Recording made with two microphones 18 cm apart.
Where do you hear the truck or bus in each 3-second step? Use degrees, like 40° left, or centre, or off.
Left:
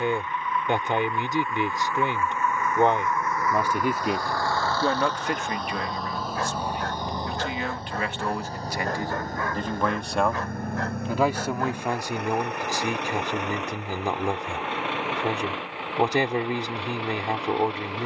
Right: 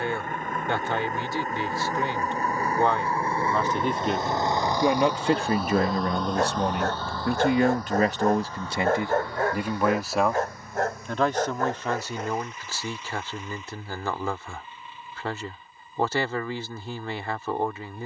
40° right, 20° right, 20° left, 50° left, 70° left, 80° left.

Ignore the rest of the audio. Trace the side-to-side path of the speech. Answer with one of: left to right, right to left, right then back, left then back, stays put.
right then back.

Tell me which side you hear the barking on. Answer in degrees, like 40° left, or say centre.
40° right.